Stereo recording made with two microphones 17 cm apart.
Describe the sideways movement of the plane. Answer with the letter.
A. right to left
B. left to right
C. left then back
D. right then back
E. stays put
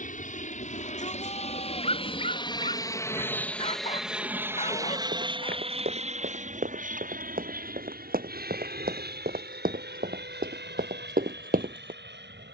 B.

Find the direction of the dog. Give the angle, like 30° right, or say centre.
40° left.